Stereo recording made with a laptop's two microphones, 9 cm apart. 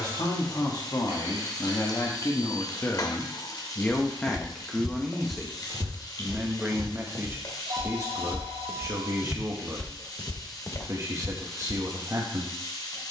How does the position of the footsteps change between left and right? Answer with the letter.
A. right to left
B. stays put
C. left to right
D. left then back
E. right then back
E.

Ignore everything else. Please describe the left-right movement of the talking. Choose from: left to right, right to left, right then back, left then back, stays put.
left to right.